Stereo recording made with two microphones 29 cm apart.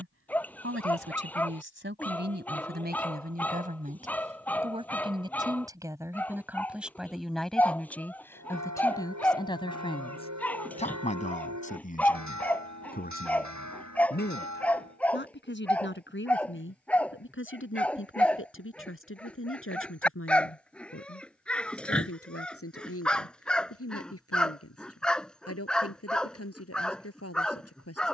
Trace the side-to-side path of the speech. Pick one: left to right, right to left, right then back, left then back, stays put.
right to left.